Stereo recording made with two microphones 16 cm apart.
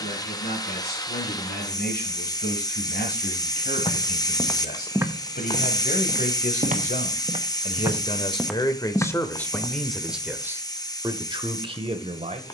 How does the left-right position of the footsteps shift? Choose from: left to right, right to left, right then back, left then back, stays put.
right then back.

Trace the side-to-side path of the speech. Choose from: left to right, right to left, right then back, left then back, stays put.
left to right.